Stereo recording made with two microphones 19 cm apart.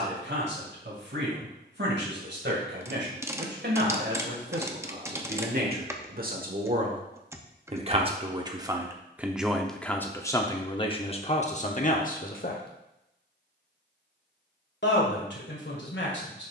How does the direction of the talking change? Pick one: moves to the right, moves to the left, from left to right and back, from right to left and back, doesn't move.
moves to the left.